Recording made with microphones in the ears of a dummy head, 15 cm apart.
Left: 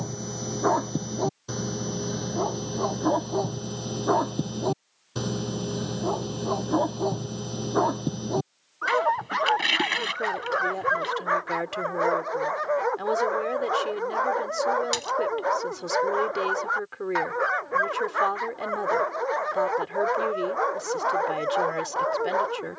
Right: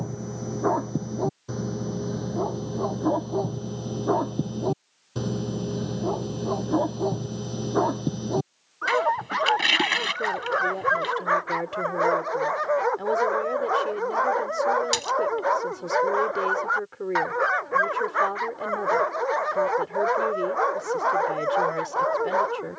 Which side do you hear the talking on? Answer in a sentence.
In this clip you hear the talking on the left.